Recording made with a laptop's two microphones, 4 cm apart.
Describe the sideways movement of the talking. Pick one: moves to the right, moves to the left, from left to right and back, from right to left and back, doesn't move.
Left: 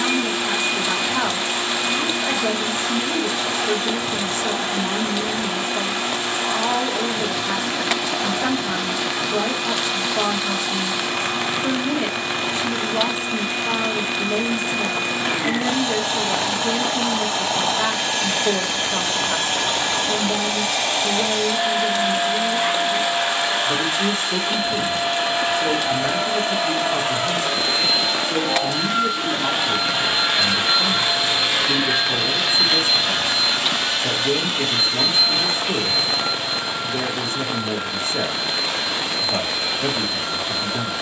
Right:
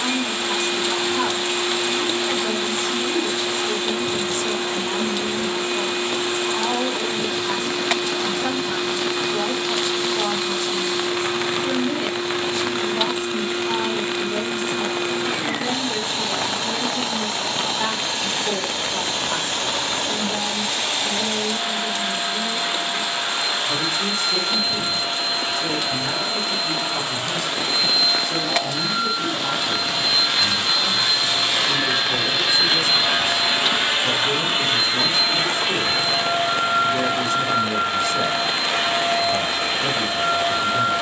doesn't move.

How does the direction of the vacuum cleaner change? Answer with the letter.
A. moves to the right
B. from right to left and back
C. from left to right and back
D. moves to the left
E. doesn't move
A.